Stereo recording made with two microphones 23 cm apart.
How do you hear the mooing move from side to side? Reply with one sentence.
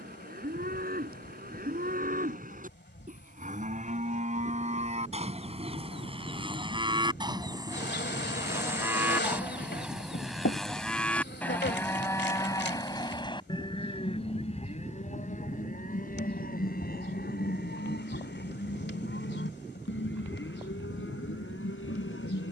You can hear the mooing move from right to left.